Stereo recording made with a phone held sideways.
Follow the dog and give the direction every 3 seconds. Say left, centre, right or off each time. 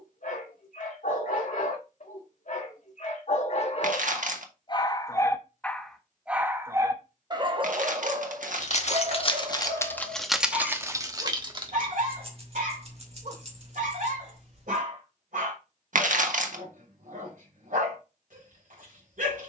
left, left, right, right, right, right, right.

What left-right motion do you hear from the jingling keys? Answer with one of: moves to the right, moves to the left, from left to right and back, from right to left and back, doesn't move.
moves to the right.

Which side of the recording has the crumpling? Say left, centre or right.
right.